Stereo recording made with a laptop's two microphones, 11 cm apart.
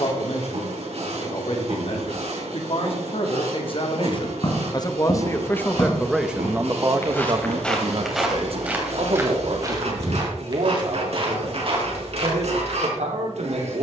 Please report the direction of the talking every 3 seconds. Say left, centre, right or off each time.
left, left, right, right, right.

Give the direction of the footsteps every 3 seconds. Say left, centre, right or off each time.
off, left, centre, right, right.